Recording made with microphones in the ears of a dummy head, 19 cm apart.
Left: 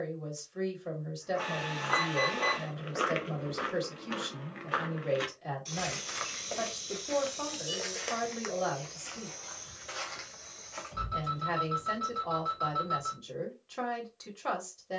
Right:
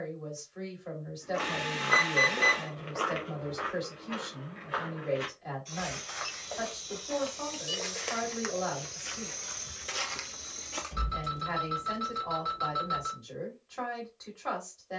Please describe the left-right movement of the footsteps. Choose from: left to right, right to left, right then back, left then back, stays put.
left then back.